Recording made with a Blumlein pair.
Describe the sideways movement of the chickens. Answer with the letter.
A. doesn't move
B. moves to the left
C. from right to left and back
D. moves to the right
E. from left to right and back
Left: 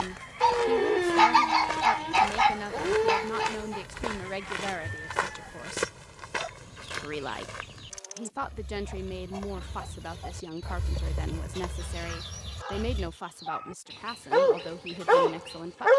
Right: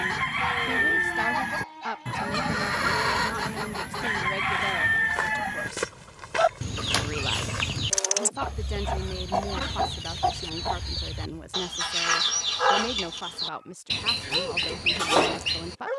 A.